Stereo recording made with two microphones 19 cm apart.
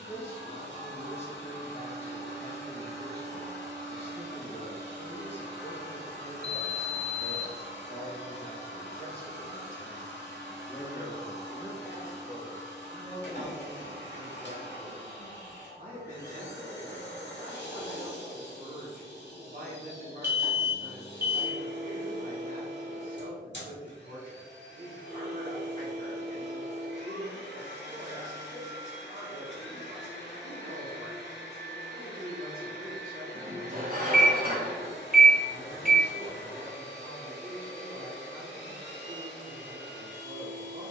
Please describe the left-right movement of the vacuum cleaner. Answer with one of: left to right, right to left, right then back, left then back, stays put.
stays put.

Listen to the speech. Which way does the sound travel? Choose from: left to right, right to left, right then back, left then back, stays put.
left to right.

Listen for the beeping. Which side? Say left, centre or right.
right.